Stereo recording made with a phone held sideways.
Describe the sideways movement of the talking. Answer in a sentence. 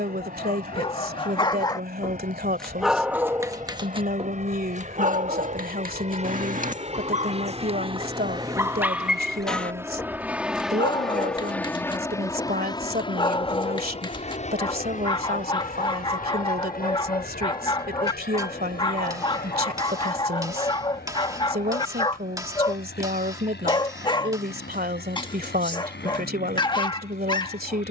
You can hear the talking stay in one place.